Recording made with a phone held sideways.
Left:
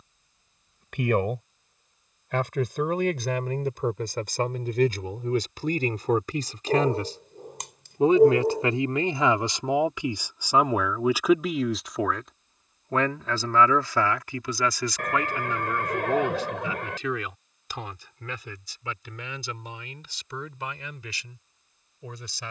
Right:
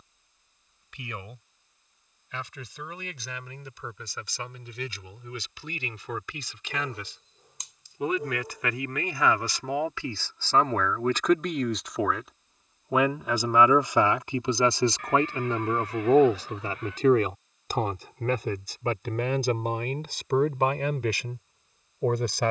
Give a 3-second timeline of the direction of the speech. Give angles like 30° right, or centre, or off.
60° left, 50° left, 40° left, 10° left, 20° right, 40° right, 50° right, 60° right.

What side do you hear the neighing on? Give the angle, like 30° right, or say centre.
70° left.